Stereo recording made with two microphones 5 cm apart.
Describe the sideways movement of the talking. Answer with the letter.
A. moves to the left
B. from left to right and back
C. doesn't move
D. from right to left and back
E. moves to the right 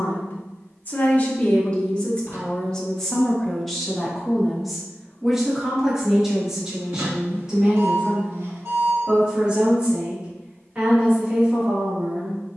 E.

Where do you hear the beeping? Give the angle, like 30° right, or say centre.
70° right.